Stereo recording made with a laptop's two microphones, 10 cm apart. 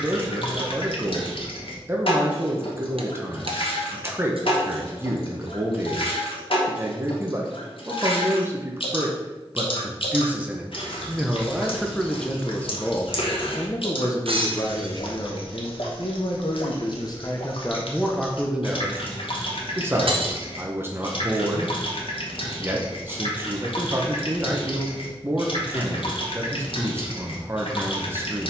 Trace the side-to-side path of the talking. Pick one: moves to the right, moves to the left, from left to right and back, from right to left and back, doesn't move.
from right to left and back.